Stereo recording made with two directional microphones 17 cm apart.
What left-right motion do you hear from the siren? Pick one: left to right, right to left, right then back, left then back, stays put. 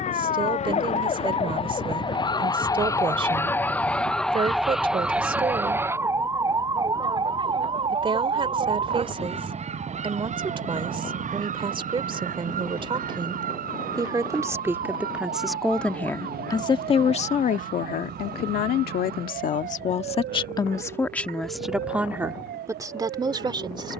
left to right.